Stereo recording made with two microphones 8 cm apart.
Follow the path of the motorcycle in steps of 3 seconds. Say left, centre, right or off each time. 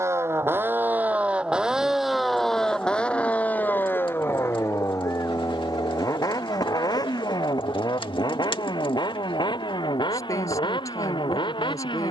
centre, left, left, left.